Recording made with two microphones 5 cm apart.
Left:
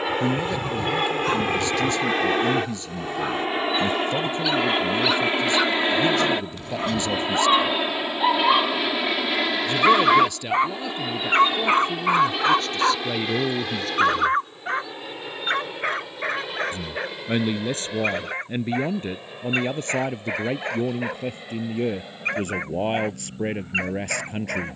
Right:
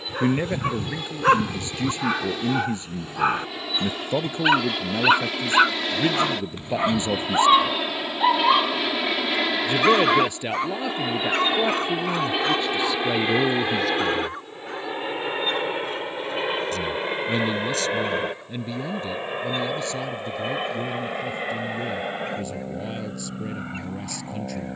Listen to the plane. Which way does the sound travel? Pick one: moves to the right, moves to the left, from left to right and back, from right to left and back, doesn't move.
moves to the right.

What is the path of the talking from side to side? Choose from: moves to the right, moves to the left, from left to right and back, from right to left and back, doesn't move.
moves to the left.